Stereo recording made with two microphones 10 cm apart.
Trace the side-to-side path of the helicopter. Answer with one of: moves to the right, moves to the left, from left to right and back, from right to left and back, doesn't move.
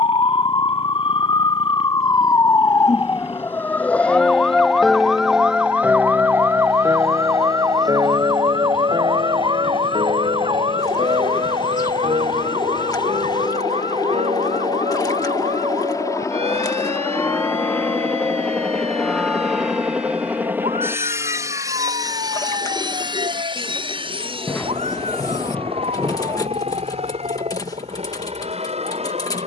moves to the right.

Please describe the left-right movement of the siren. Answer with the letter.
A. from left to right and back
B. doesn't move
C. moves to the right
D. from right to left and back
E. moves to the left
C.